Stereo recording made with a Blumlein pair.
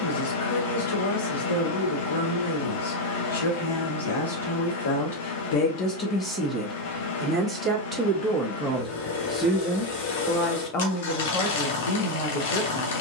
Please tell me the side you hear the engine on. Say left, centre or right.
left.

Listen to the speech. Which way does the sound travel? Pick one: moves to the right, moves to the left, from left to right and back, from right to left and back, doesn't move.
from left to right and back.